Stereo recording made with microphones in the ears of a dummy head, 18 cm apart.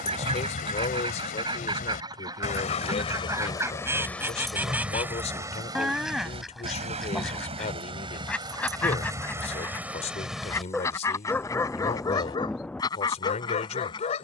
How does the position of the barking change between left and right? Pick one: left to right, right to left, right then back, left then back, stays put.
right then back.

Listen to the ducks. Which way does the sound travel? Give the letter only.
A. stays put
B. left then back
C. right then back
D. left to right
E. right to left
E.